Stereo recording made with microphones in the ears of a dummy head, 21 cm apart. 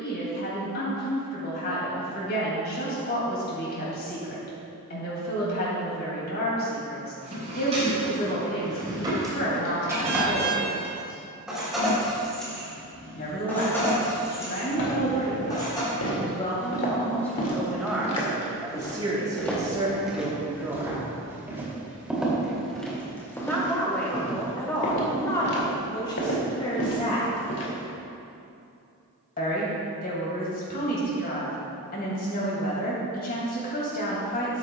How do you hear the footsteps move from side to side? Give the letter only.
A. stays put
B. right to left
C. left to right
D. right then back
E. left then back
D.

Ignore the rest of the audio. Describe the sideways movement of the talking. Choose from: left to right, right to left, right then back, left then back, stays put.
right then back.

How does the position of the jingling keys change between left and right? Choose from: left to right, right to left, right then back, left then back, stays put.
right to left.